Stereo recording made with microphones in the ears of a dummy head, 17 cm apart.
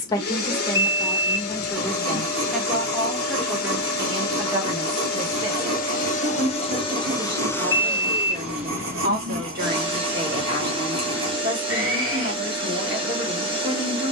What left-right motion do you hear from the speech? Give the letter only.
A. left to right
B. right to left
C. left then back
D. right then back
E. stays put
A.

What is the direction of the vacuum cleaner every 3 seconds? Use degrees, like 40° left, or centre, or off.
50° left, 50° left, 10° left, 30° right, 30° right.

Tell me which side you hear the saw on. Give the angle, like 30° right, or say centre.
80° right.